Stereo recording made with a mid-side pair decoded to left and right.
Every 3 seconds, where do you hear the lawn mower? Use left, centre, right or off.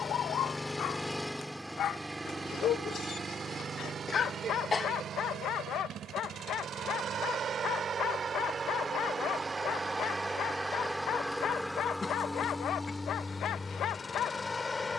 centre, right, right, centre, left.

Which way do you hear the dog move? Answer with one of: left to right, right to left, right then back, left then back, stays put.
stays put.